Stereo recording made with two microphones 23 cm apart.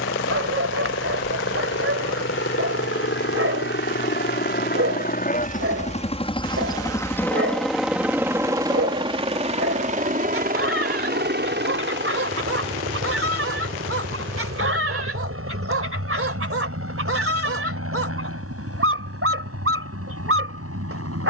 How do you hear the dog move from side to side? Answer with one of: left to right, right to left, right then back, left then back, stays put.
stays put.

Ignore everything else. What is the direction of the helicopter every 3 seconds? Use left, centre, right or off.
left, left, centre, right, right, right, right.